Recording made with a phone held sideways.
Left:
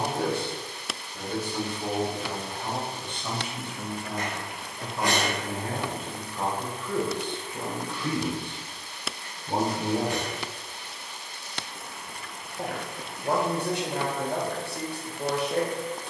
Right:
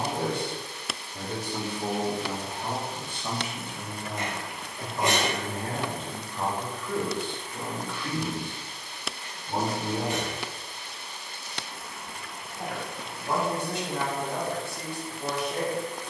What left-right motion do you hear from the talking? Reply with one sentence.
In this clip you hear the talking move from right to left.